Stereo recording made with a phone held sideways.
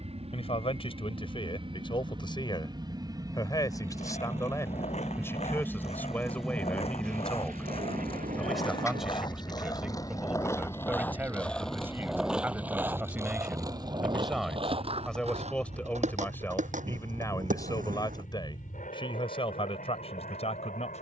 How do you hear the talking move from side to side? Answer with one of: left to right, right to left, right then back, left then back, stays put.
right then back.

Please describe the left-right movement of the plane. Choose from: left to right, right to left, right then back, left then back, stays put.
right to left.